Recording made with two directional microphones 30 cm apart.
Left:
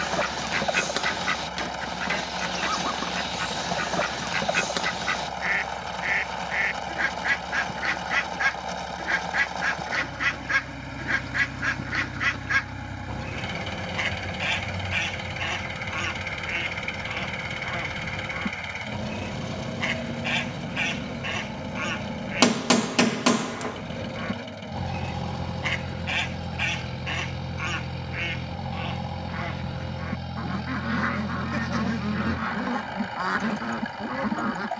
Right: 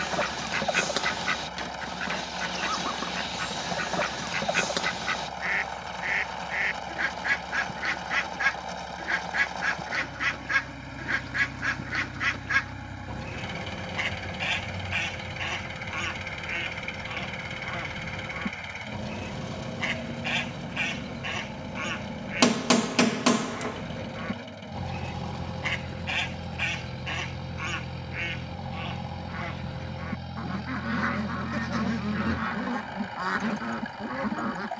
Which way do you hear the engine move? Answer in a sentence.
You can hear the engine stay in one place.